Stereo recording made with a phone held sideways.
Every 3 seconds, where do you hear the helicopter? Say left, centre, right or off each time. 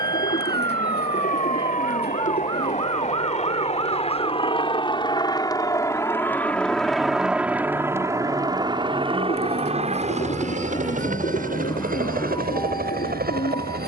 left, left, centre, right, right.